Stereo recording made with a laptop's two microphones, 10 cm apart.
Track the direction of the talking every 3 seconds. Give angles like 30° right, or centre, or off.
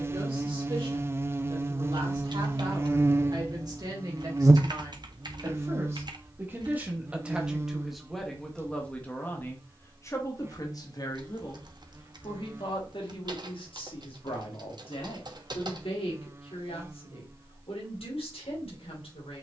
50° right, 40° right, 10° right, 30° left, 60° left, 70° left, 80° left.